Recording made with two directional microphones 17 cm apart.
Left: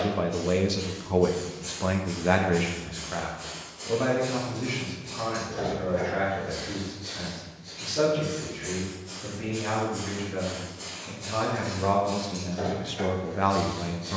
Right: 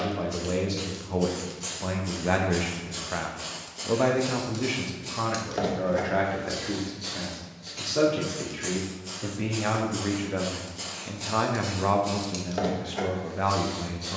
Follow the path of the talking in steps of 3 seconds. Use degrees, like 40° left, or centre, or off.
10° left, 40° right, 60° right, 40° right, 10° left.